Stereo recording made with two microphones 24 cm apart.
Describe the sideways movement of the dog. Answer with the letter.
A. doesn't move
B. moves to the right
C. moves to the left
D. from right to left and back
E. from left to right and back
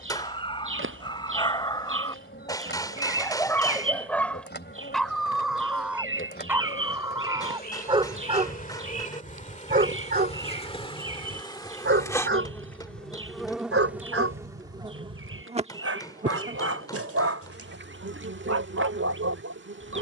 B.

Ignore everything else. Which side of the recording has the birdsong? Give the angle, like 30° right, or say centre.
60° right.